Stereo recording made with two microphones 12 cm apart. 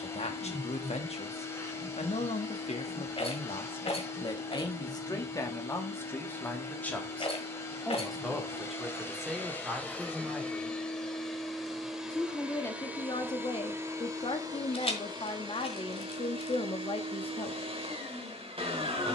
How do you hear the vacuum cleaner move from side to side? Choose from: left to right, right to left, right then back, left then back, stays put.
left to right.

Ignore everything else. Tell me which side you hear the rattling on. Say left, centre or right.
left.